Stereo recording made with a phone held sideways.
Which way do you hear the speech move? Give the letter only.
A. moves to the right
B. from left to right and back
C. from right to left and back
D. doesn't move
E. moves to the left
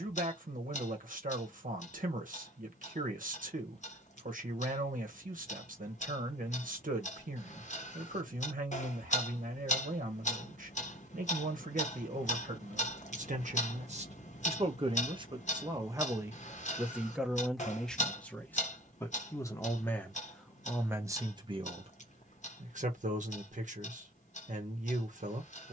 C.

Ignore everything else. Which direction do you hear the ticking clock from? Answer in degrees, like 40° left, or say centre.
50° left.